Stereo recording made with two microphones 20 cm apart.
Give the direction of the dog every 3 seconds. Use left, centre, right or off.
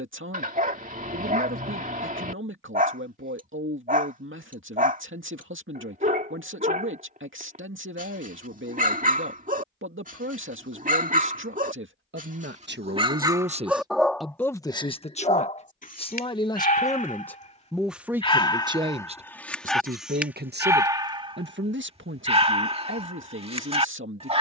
right, right, right, right, centre, left, centre, right.